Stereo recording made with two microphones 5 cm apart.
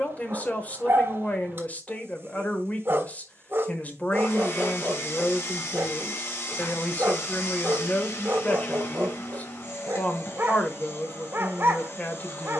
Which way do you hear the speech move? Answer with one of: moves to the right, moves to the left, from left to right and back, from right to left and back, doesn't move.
doesn't move.